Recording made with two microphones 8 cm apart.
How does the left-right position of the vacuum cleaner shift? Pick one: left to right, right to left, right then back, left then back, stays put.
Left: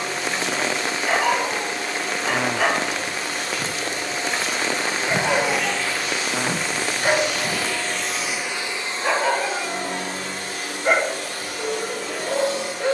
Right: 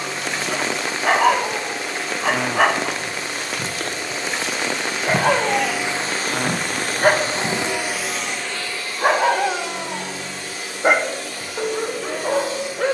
right then back.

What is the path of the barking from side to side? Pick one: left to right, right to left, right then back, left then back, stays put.
stays put.